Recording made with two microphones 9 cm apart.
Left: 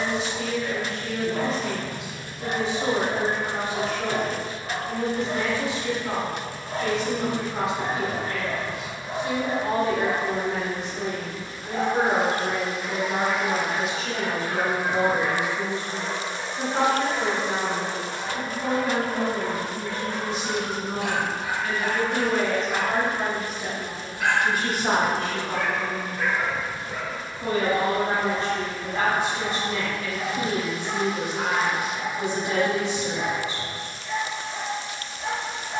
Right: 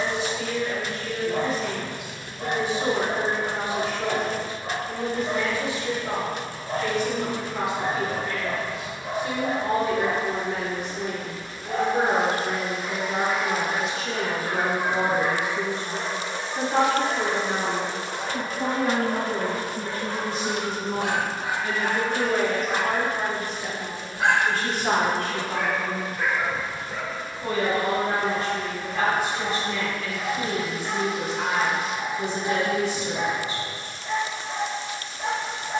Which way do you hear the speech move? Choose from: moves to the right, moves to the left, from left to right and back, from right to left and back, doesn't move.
from left to right and back.